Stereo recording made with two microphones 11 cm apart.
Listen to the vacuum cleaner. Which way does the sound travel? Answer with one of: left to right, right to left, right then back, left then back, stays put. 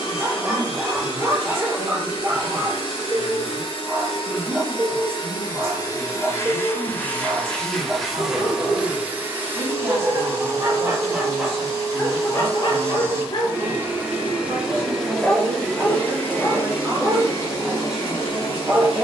right then back.